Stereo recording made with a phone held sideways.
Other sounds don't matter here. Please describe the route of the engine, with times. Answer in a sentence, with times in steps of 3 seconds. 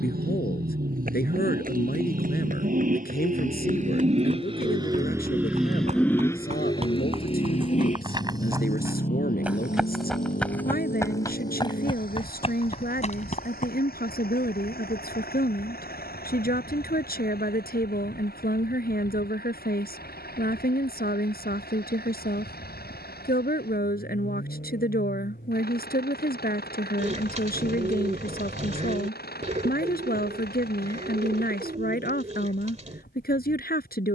In this clip you hear the engine on the right from 0 s and on the left from 6 s.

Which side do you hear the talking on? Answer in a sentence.
In this clip you hear the talking on the left.